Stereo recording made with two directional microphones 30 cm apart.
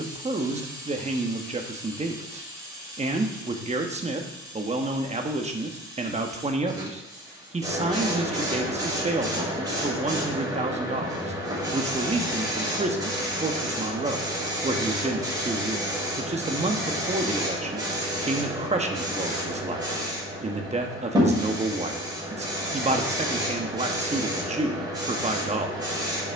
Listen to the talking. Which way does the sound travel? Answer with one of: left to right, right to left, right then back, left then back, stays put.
stays put.